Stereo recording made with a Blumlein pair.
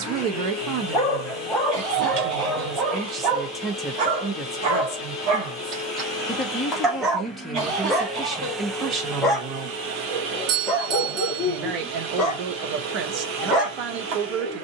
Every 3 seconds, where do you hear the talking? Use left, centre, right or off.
right, centre, centre, right, right.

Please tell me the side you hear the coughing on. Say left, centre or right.
right.